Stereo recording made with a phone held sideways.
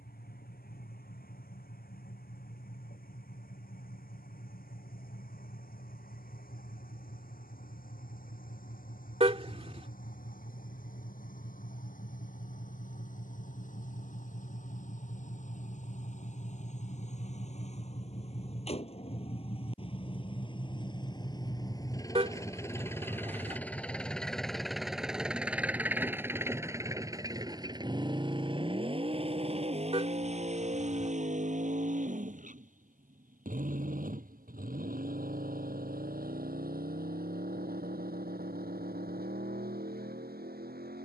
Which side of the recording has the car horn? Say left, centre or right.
right.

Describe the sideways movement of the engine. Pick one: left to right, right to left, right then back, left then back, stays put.
left to right.